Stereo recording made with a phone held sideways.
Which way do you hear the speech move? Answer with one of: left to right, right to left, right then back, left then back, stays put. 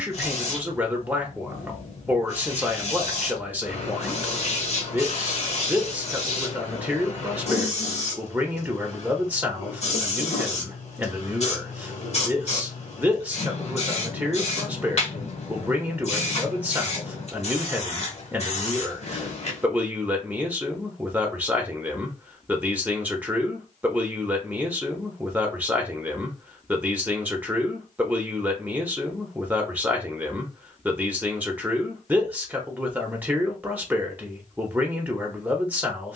stays put.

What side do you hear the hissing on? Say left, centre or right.
left.